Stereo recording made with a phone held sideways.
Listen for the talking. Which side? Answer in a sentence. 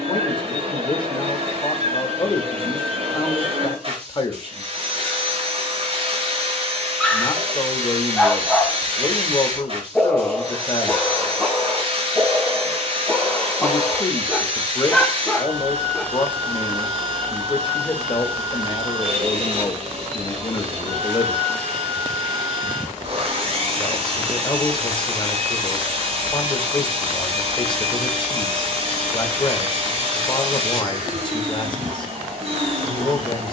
You can hear the talking on the left.